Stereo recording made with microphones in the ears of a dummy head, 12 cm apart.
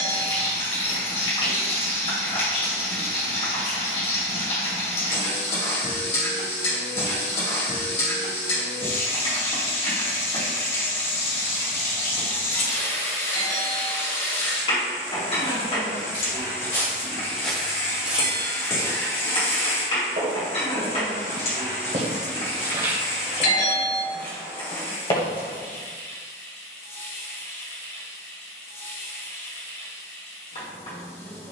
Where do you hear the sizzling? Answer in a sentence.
In this clip you hear the sizzling on the left.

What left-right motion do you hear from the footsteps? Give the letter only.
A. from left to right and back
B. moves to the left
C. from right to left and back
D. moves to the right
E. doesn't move
A.